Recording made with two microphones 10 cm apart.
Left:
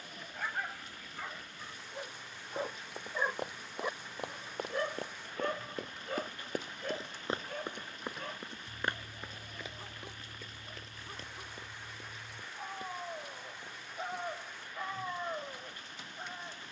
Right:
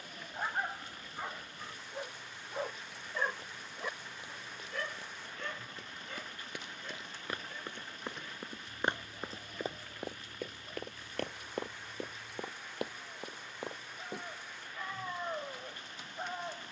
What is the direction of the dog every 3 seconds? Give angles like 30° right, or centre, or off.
20° right, 30° left, 60° left, 80° left, 60° left, 20° right.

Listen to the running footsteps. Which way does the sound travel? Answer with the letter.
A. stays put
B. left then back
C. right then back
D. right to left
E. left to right
E.